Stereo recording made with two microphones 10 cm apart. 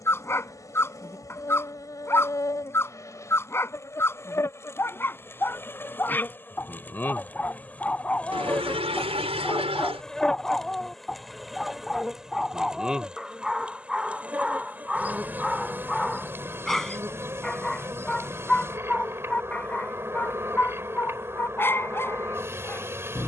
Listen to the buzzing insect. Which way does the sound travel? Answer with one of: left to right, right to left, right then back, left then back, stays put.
left to right.